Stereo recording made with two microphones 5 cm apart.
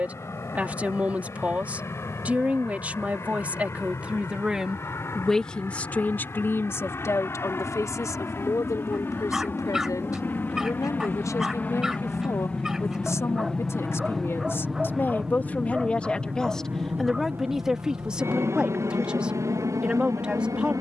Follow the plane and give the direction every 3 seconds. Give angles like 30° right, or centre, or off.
60° left, 50° left, 50° left, 40° left, 10° left, 30° right, 60° right.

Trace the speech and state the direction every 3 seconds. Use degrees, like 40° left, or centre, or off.
20° right, 10° right, 60° left, 80° left, 60° left, 10° left, 20° right.